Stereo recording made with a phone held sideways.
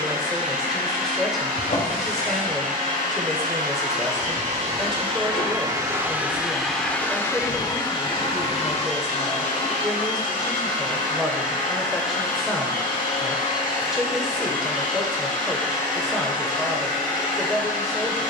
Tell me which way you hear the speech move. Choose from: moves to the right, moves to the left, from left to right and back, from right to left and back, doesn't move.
doesn't move.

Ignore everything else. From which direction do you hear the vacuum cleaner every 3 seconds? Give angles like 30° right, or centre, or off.
70° right, 40° right, 20° left, 60° left, 60° left, 60° left.